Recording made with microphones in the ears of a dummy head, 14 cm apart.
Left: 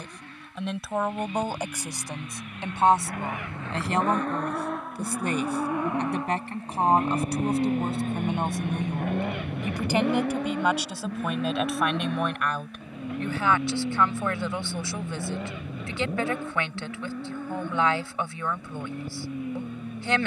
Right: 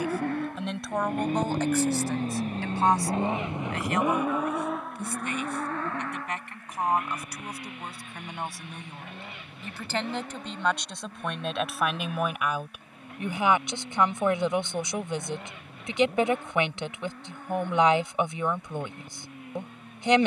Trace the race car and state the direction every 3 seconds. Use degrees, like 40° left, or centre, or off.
40° right, centre, 30° left, 50° left, 60° left, 70° left, 70° left.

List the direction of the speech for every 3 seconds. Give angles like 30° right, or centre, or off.
10° left, 30° left, 30° left, 10° left, 10° right, 20° right, 20° right.